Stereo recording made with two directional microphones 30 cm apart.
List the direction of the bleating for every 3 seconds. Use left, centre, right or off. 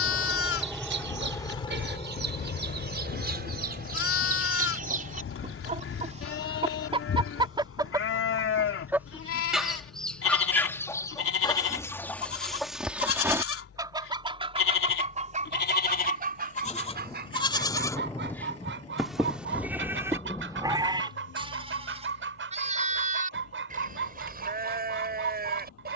left, left, left, left, left, left, centre, right, right.